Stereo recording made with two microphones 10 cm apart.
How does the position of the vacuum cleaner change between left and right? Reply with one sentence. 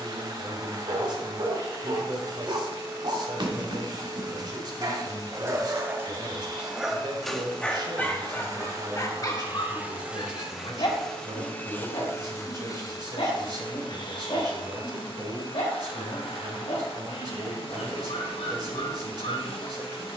You can hear the vacuum cleaner travel towards the left.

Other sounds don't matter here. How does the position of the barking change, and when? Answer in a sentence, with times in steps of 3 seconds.
In this clip you hear the barking on the right from 0 s, in the centre from 6 s and on the left from 9 s.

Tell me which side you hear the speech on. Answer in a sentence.
In this clip you hear the speech on the right.